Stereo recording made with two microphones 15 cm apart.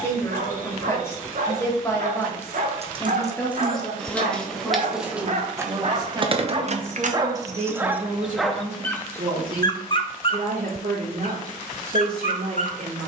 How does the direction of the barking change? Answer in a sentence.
You can hear the barking go from the right side to the left.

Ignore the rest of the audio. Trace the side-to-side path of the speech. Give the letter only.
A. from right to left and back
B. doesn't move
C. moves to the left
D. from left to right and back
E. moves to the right
E.